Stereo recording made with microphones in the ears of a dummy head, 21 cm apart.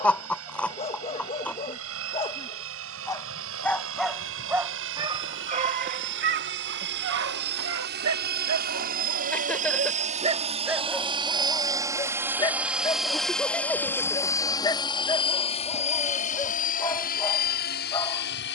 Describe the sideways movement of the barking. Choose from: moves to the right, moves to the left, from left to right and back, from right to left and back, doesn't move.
from left to right and back.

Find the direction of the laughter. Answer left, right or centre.
centre.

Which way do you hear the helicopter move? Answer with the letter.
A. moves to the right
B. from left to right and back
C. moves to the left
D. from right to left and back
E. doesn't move
C.